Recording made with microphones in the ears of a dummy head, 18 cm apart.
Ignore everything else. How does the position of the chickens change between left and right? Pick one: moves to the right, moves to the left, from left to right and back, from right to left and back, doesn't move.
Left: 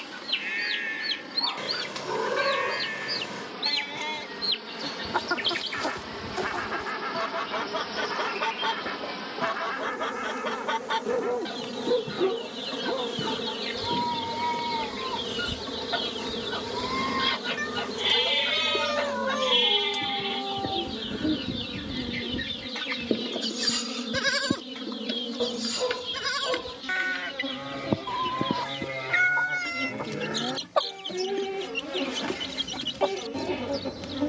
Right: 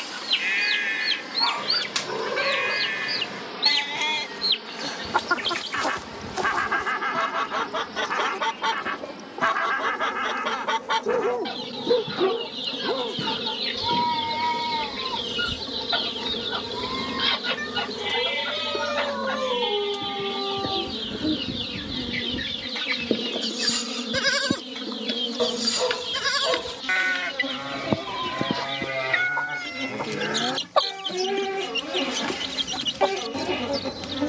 doesn't move.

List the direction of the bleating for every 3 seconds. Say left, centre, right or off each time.
right, right, right, right, right, centre, left, centre, right, right, right, right.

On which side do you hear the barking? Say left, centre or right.
right.